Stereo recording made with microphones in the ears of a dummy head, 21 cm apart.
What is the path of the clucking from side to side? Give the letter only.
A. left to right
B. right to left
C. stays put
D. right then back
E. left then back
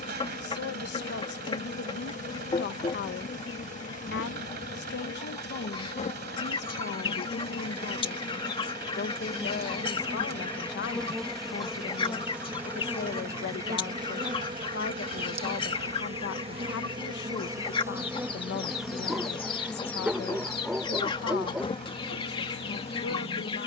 C.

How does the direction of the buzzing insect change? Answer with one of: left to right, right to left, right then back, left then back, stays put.
right then back.